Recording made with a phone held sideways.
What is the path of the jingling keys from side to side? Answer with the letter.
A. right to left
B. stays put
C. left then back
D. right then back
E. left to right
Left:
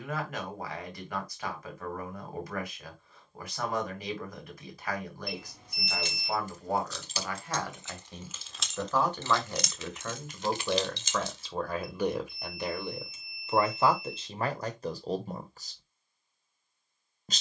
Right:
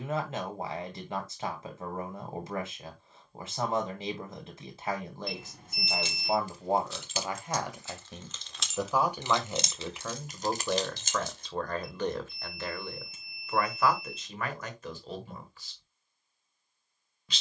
E.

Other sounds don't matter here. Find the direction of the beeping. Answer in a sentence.
In this clip you hear the beeping on the right.